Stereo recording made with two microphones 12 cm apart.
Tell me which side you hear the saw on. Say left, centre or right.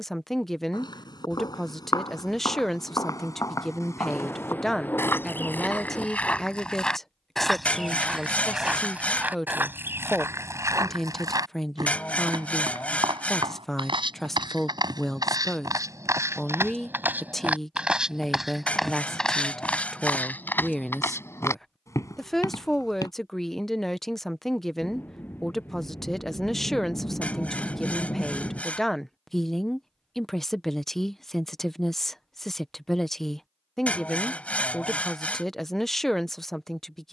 centre.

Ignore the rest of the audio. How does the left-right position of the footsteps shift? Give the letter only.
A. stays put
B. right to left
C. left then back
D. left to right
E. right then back
E.